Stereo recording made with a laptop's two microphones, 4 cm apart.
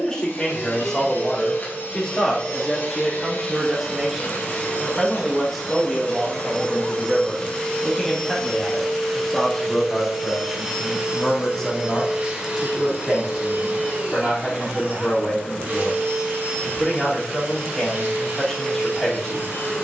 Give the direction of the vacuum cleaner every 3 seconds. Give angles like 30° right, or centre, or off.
50° left, 40° left, 20° left, 10° right, 40° right, 50° right, 60° right.